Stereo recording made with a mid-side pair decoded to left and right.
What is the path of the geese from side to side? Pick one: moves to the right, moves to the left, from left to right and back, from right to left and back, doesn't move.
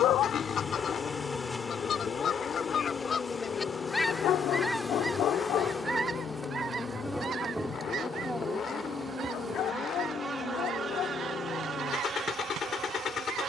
moves to the right.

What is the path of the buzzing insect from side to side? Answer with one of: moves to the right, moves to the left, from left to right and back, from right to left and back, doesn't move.
moves to the right.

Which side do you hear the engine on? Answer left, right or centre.
left.